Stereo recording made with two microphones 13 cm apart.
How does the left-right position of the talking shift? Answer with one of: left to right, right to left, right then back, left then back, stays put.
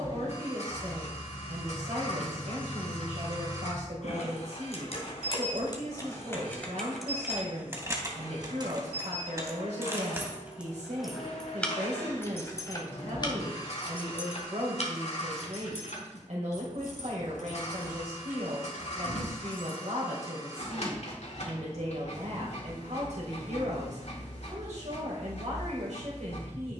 stays put.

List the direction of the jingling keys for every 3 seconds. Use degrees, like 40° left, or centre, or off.
80° left, 50° left, 10° right, 10° right, 40° left, 60° left, 70° left, off, off.